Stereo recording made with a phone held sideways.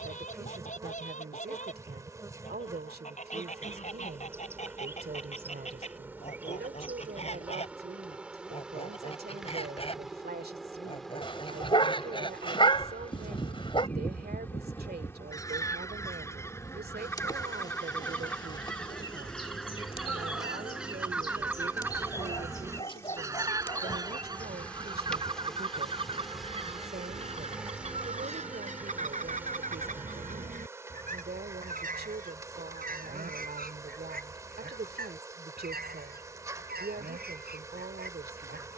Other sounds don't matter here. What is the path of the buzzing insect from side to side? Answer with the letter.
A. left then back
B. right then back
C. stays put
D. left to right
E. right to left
A.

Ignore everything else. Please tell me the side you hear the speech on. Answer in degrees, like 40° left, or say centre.
70° right.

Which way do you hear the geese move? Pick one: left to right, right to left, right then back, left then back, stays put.
left to right.